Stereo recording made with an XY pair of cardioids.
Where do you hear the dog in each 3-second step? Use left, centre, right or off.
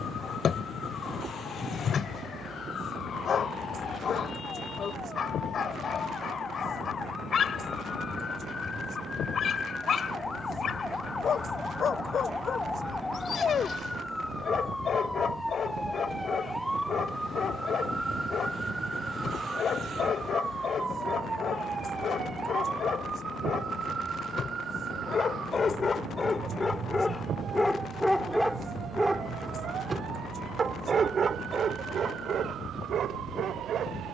left, left, left, left, left, left, left, left, left, centre, right, right.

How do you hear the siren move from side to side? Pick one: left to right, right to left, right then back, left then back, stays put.
left to right.